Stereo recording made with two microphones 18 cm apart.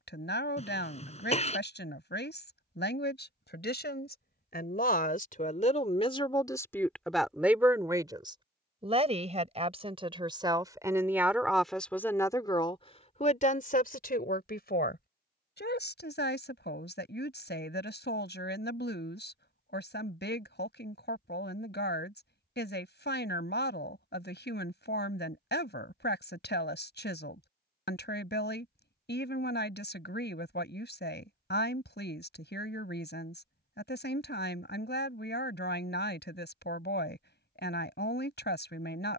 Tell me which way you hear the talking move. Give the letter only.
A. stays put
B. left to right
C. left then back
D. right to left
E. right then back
E.